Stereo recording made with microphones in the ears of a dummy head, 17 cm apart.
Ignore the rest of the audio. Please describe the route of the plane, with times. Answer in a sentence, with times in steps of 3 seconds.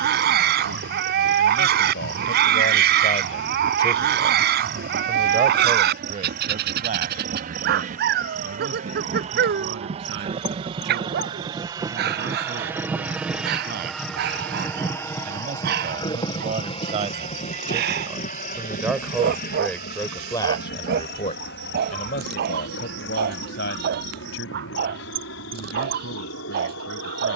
In this clip you hear the plane on the right from 0 s, in the centre from 12 s and on the left from 15 s.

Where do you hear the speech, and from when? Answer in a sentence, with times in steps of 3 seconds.
You can hear the speech on the left from 0 s, in the centre from 3 s, on the right from 6 s, in the centre from 18 s and on the left from 21 s.